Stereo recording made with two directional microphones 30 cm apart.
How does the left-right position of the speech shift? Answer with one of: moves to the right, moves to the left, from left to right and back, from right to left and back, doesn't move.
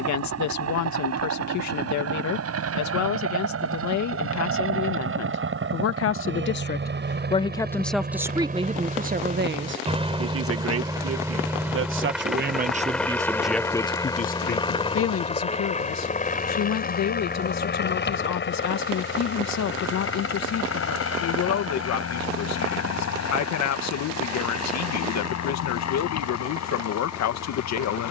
from left to right and back.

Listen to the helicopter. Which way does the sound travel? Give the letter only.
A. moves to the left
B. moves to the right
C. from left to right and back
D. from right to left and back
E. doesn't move
A.